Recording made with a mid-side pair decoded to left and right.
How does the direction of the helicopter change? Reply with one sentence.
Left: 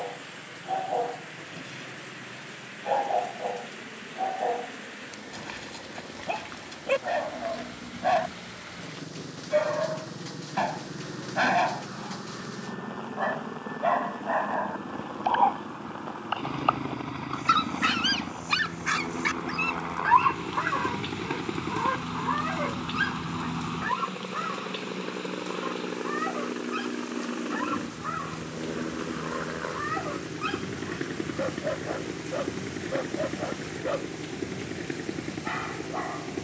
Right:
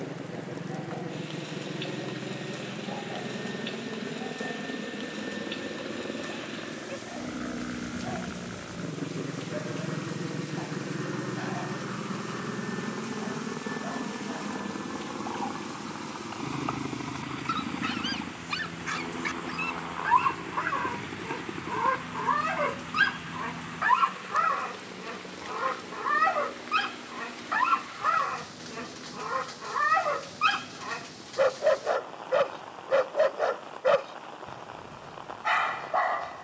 You can hear the helicopter go from the right side to the left.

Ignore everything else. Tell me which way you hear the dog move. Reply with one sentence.
In this clip you hear the dog travel towards the right.